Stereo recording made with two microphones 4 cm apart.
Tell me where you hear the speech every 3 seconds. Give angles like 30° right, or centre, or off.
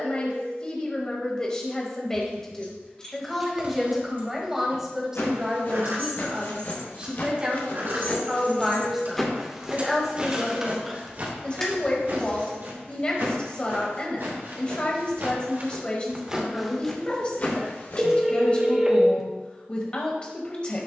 20° left, 10° right, 20° right, 10° left, 30° left, 30° left, 30° left.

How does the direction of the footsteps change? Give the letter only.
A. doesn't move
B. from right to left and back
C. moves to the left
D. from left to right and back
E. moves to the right
D.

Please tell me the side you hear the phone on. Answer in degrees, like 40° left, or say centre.
20° right.